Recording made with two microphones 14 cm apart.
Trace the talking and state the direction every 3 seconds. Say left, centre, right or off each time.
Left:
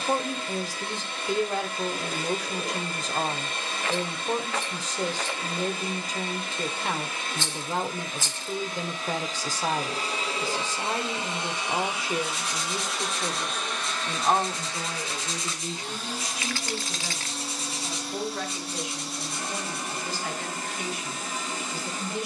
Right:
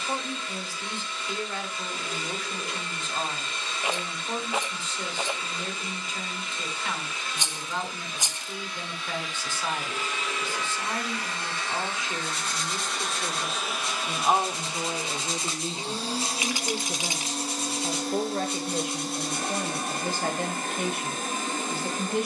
left, left, left, left, centre, right, right, right.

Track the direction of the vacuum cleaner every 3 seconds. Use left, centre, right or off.
left, left, left, left, centre, right, right, right.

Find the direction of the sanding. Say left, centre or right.
right.